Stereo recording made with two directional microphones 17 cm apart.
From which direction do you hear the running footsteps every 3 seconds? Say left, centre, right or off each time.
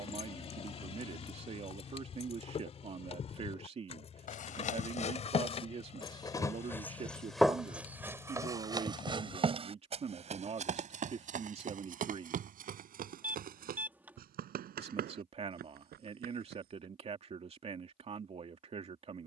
off, left, centre, right, right, right, off.